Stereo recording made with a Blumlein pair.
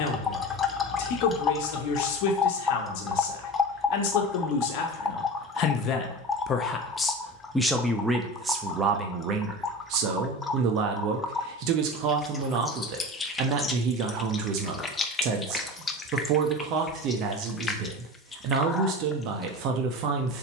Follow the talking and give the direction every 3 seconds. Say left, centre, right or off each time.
left, left, centre, right, right, right, right.